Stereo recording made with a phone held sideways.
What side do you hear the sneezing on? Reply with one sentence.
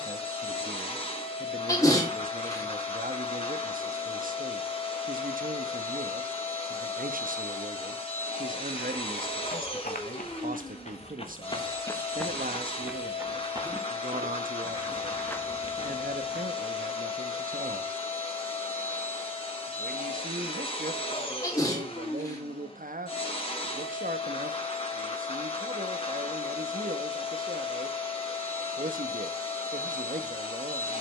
You can hear the sneezing on the left.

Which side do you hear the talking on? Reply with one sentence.
In this clip you hear the talking on the right.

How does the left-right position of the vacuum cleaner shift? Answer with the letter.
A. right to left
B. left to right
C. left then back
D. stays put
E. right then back
D.